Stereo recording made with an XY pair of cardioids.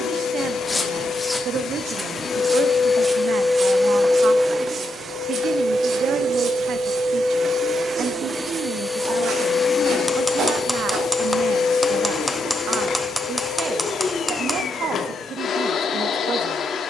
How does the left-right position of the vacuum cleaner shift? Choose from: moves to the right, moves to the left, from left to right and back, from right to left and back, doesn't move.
from left to right and back.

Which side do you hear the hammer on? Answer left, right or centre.
centre.